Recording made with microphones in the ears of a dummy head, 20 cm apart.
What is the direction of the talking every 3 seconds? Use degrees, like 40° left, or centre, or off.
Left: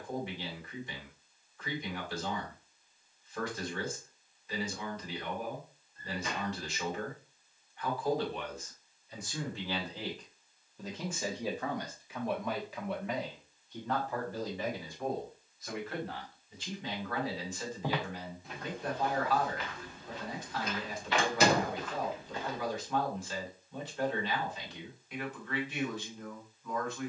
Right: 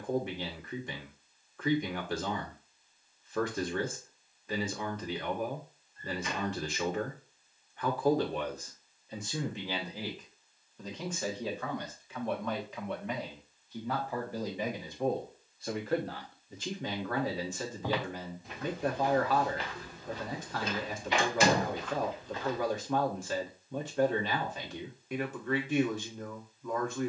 50° right, 50° right, 40° right, centre, centre, 40° right, 40° right, 40° right, 40° right.